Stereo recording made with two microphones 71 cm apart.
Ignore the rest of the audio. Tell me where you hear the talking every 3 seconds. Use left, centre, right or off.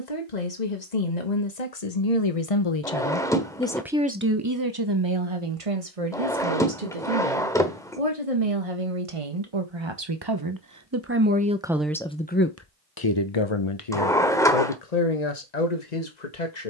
left, right, right, right, left, left.